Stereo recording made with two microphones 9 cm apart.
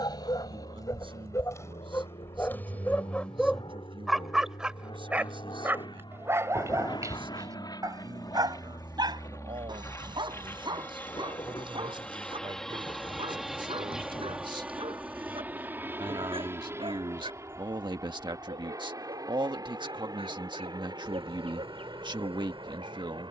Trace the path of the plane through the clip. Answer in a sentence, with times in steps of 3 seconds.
You can hear the plane on the left from 0 s, in the centre from 12 s and on the right from 15 s.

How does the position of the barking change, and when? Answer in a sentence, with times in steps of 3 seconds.
In this clip you hear the barking on the left from 0 s, in the centre from 3 s and on the right from 6 s.